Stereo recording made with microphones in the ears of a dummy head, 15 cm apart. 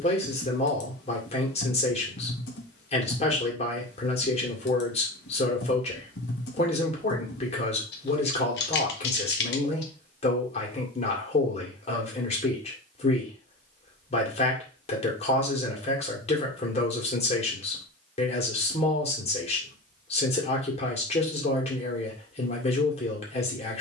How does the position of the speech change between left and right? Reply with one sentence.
In this clip you hear the speech stay in one place.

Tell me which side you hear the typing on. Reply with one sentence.
In this clip you hear the typing on the left.